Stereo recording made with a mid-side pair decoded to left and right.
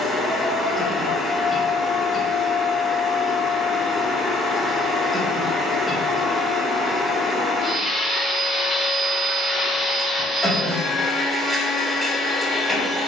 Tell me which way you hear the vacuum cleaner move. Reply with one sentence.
You can hear the vacuum cleaner stay in one place.